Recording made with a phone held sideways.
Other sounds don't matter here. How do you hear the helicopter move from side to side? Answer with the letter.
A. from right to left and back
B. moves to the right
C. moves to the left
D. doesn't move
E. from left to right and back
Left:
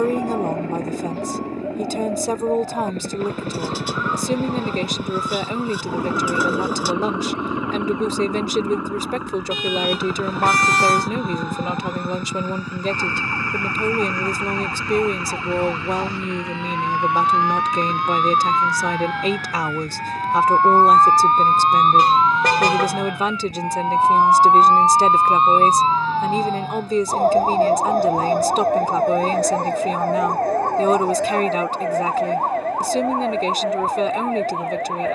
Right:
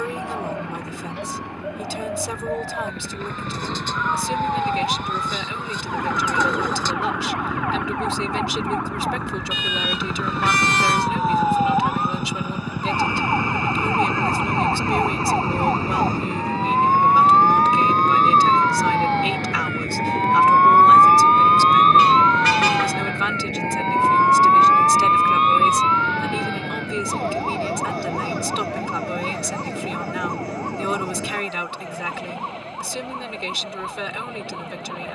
B.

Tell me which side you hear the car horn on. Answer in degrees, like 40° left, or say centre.
40° left.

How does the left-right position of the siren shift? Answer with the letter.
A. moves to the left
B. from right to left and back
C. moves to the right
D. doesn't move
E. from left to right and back
A.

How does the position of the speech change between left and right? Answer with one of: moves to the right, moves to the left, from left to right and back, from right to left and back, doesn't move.
doesn't move.